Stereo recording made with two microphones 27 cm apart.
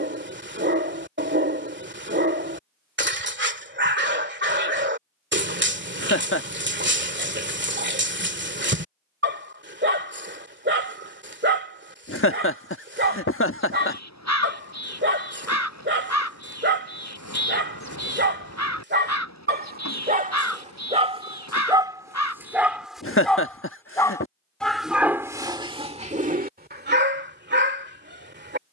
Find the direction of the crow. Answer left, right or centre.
left.